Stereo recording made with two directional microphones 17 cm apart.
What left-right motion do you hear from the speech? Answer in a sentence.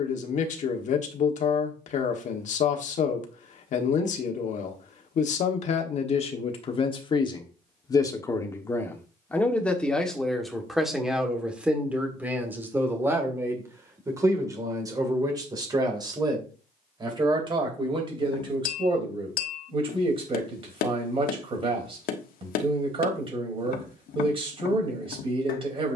In this clip you hear the speech travel towards the right.